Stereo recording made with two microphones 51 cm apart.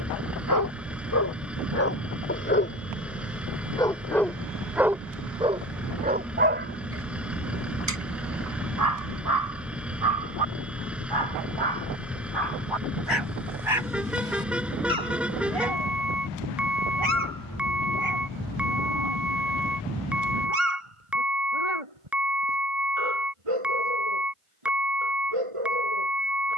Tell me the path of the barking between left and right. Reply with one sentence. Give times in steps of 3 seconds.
In this clip you hear the barking on the left from 0 s, in the centre from 3 s and on the right from 6 s.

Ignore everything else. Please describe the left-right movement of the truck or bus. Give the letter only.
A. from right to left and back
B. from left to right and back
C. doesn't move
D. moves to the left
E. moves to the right
C.